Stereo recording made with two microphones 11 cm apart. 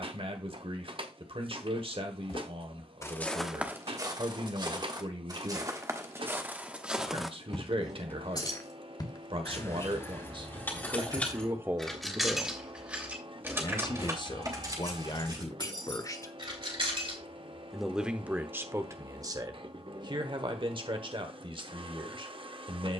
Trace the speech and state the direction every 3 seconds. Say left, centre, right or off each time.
right, right, right, right, left, left, right, right.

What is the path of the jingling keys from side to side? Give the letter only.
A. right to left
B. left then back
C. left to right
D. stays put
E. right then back
C.